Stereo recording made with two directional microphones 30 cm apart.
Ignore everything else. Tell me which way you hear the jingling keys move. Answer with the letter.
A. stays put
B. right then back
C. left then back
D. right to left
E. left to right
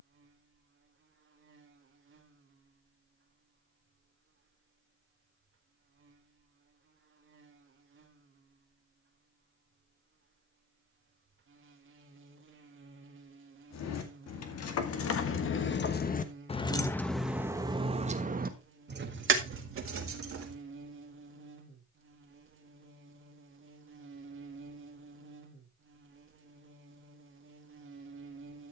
E.